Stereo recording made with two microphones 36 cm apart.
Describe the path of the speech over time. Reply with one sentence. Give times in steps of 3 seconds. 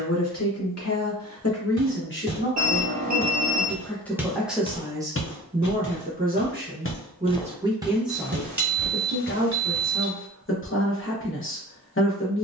You can hear the speech on the left from 0 s, in the centre from 3 s and on the left from 9 s.